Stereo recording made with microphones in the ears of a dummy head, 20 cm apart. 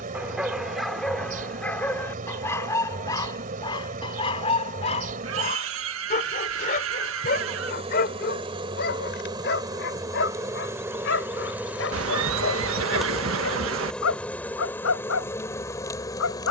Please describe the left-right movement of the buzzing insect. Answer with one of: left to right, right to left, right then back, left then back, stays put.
right to left.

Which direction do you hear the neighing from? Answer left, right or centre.
right.